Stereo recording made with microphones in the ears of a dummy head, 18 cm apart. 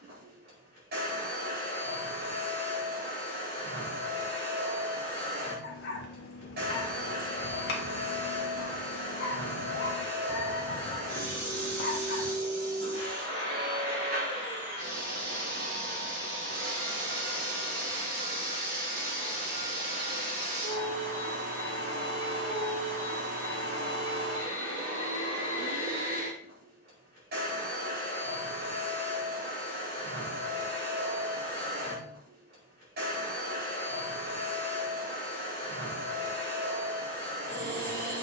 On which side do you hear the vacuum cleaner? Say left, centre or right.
right.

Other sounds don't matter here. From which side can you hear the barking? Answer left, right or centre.
left.